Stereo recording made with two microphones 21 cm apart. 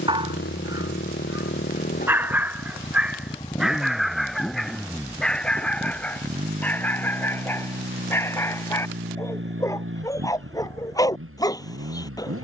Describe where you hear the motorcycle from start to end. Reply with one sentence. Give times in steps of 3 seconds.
In this clip you hear the motorcycle on the left from 0 s, in the centre from 3 s and on the right from 6 s.